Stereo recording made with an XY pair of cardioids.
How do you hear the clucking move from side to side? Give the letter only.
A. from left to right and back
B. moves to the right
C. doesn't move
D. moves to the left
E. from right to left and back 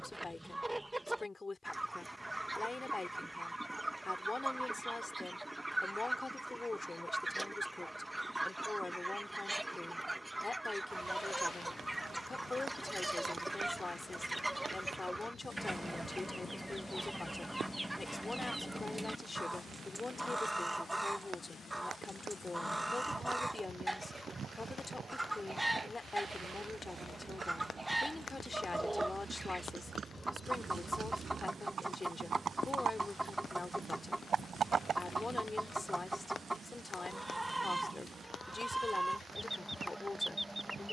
C.